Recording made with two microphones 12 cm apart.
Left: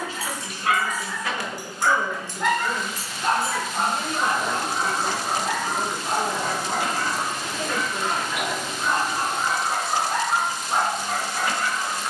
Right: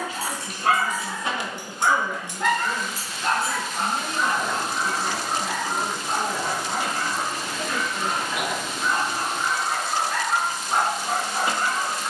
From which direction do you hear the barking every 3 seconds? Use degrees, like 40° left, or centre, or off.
20° right, 40° left, 60° left, 10° left.